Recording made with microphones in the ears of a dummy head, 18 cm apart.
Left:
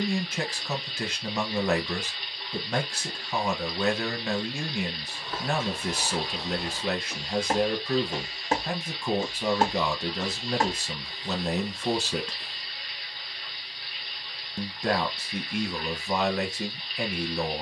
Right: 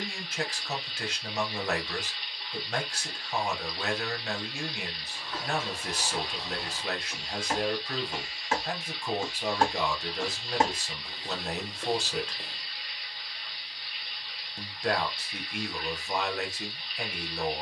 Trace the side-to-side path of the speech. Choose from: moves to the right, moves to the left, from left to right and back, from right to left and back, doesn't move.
doesn't move.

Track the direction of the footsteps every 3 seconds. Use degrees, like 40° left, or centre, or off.
off, 60° left, 50° left, 20° right, 50° right, off.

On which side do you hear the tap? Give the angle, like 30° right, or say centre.
70° left.